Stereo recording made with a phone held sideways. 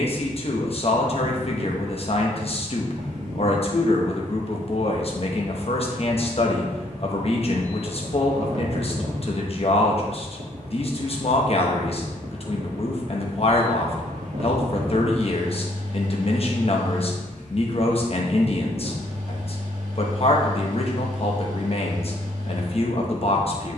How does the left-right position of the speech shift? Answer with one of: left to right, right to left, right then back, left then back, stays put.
stays put.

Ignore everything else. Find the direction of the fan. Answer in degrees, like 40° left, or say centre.
80° right.